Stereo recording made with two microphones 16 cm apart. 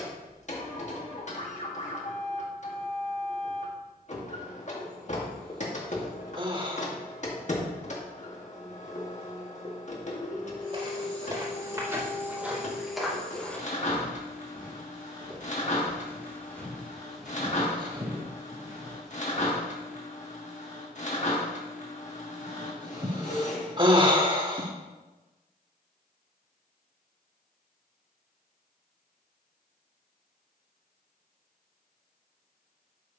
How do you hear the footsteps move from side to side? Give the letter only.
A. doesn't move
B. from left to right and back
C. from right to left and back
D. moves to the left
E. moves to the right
C.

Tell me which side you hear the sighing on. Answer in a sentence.
You can hear the sighing on the right.